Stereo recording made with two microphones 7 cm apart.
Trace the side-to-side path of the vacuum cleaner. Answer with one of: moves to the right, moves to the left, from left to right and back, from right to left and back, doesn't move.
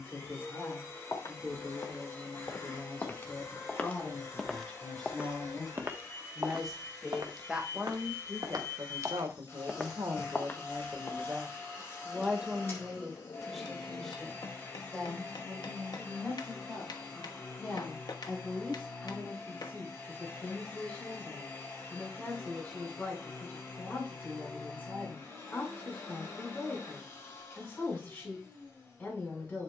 doesn't move.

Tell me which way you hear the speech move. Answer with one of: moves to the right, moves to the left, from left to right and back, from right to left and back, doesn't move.
from left to right and back.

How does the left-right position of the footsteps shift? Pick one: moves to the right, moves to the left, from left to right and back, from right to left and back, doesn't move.
from left to right and back.